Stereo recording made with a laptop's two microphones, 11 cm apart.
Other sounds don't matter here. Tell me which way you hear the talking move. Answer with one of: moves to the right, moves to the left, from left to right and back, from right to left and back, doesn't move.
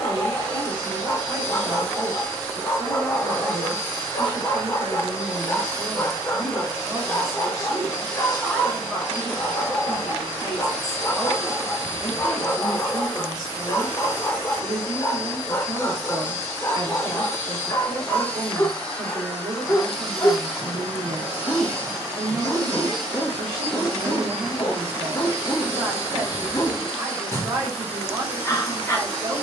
from right to left and back.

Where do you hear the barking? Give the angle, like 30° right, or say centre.
30° left.